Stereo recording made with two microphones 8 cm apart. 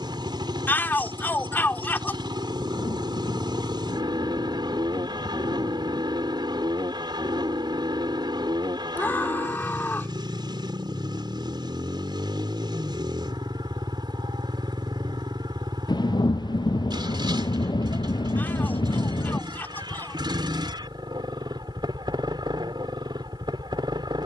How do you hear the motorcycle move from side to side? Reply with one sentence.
You can hear the motorcycle stay in one place.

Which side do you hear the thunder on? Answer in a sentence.
You can hear the thunder on the left.